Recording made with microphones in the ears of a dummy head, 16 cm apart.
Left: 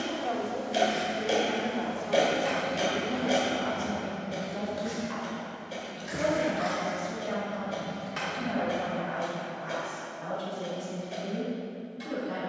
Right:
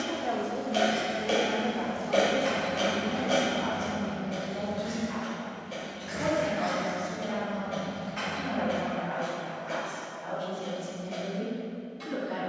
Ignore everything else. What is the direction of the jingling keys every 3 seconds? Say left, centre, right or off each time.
centre, left, left, off.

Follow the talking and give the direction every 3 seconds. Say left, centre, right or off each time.
centre, left, left, left.